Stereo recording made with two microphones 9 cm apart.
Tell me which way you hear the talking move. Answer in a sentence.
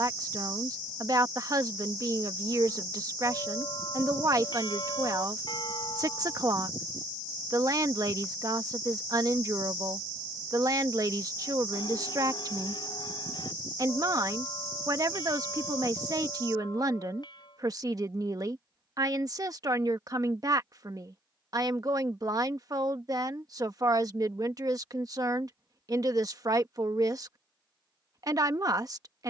In this clip you hear the talking stay in one place.